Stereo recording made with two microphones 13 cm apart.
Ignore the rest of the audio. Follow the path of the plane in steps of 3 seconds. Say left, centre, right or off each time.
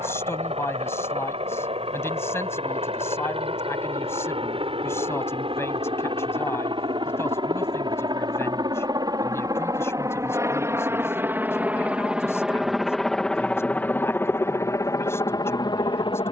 right, right, right, right, centre, left.